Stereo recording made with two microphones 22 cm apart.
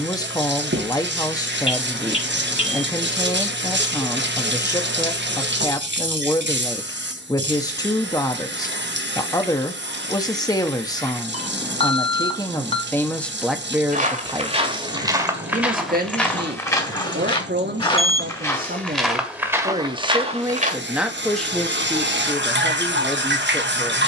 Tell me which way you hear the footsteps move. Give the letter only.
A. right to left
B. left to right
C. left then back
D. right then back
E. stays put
C.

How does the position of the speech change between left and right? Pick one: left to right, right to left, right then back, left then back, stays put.
right then back.